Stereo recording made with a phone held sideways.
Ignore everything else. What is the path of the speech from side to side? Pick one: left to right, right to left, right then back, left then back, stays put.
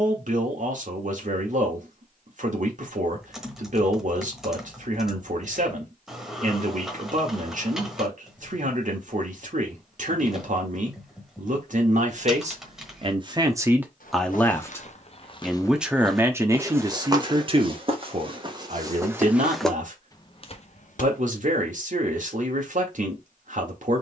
left then back.